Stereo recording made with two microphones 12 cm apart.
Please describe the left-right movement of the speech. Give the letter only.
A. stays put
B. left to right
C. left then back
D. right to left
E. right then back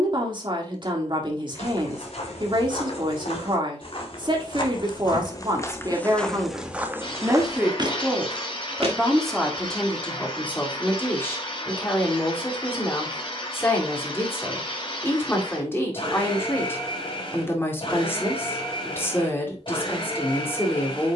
D.